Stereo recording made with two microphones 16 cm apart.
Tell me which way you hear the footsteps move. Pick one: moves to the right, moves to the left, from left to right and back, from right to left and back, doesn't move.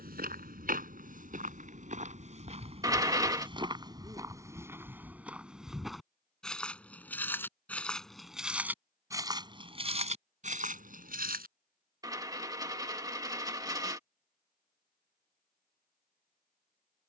from right to left and back.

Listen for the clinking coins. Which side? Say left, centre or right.
right.